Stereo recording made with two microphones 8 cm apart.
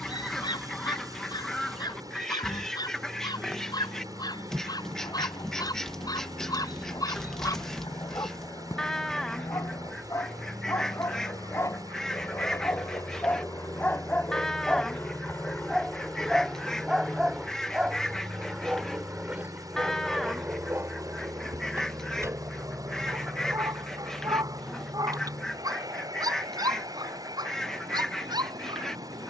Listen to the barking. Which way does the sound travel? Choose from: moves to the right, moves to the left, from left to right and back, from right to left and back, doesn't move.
moves to the right.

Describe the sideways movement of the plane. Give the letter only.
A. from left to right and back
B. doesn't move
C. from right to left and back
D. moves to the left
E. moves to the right
E.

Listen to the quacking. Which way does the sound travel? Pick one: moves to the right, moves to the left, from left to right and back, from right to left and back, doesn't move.
doesn't move.